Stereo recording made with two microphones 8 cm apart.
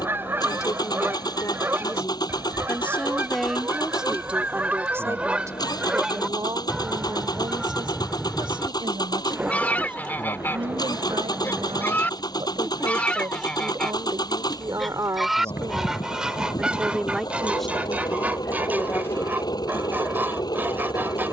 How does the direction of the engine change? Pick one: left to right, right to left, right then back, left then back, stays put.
stays put.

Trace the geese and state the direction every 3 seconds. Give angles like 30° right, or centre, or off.
20° right, 20° right, centre, 20° left, 10° left, 10° right, 20° right.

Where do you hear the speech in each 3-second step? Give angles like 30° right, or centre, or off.
30° left, 10° right, 60° right, 70° right, 50° right, 20° right, 20° left.